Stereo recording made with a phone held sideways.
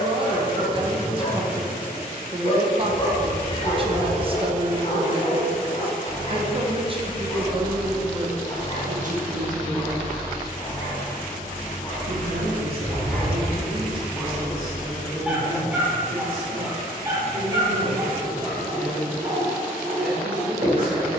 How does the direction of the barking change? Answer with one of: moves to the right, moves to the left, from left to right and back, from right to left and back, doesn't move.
moves to the right.